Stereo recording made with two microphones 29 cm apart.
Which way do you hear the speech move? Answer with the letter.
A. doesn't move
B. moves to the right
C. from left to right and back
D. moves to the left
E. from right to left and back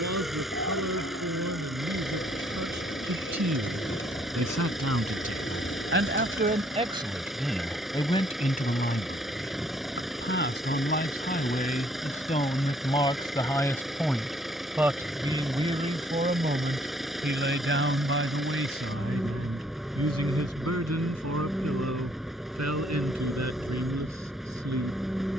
E.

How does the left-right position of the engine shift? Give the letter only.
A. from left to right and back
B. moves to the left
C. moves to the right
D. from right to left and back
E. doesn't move
E.